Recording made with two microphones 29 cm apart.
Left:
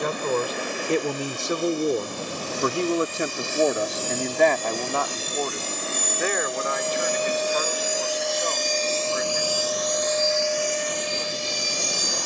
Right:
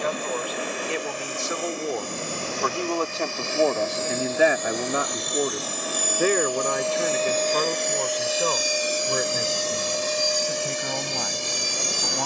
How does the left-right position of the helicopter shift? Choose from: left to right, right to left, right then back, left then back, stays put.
left to right.